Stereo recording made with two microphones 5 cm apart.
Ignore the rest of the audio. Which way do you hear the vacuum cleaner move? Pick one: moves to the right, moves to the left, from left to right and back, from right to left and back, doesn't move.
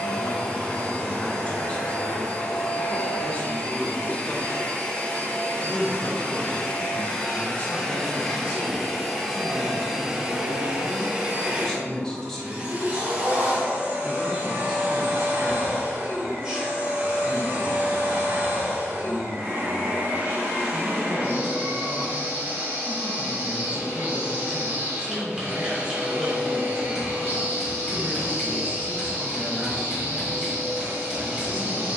moves to the right.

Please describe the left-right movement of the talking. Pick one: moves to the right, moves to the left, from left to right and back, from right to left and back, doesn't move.
moves to the right.